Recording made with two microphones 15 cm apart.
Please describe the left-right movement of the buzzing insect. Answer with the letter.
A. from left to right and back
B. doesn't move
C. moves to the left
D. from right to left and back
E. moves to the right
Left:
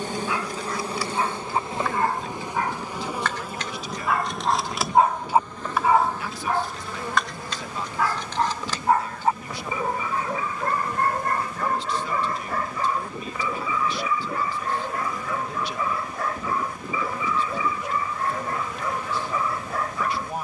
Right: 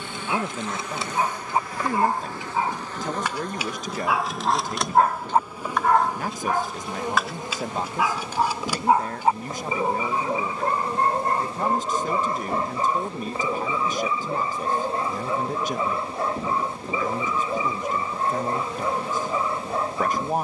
E.